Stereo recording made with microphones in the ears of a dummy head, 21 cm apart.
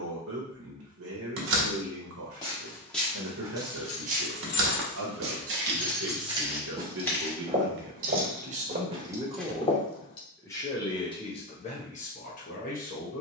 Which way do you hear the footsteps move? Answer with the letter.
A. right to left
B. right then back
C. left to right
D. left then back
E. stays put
B.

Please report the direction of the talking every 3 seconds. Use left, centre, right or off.
right, right, right, centre, left.